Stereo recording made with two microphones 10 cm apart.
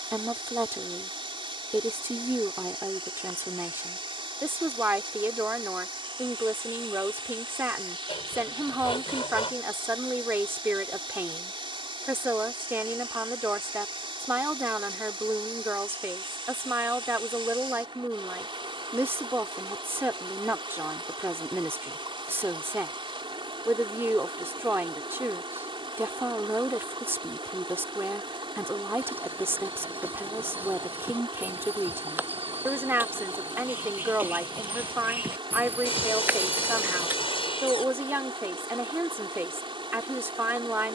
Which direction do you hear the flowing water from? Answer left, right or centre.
right.